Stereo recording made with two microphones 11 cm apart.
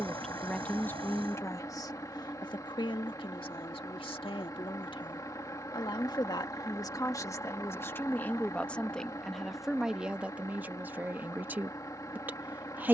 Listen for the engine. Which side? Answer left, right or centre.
left.